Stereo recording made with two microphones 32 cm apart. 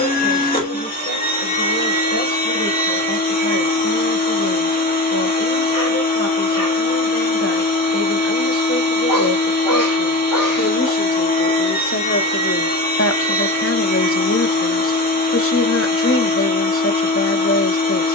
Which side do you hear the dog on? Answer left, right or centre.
left.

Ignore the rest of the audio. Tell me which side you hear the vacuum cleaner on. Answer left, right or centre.
left.